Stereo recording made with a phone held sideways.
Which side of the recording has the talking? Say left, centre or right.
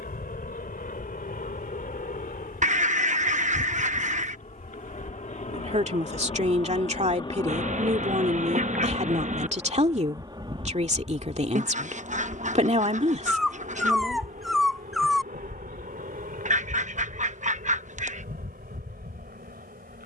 right.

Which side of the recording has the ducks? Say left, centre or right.
right.